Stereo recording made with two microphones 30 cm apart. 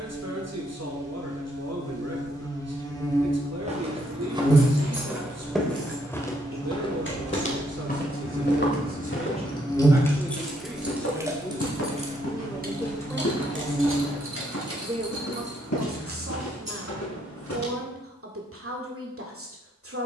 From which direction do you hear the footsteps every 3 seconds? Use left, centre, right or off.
off, centre, left, left, left, left, off.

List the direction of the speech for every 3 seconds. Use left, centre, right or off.
right, right, right, centre, centre, right, right.